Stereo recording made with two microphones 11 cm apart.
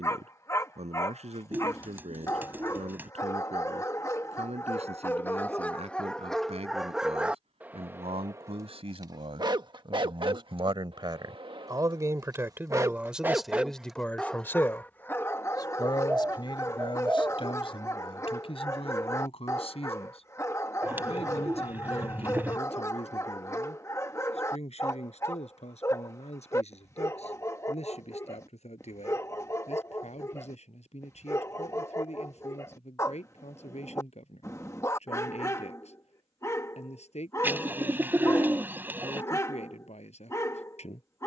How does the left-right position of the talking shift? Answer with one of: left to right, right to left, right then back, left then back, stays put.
right to left.